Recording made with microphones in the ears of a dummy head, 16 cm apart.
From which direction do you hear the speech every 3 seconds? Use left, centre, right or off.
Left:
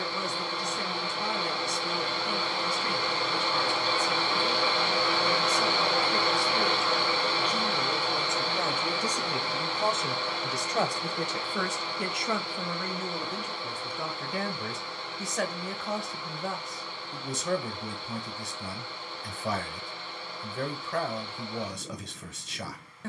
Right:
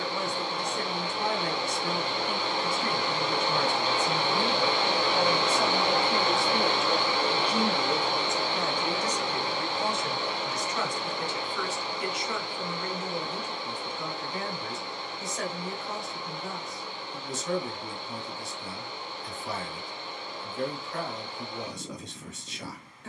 right, right, centre, left, left, left, left, left.